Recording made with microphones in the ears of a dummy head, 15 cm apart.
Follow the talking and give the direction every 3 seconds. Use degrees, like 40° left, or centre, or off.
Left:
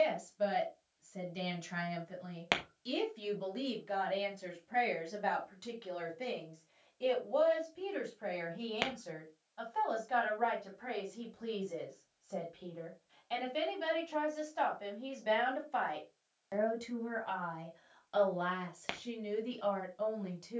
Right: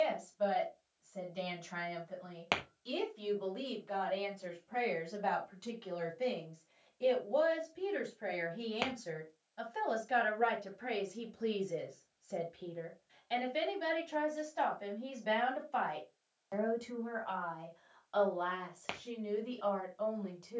20° left, 10° left, 10° right, 30° right, 10° right, 10° left, 20° left.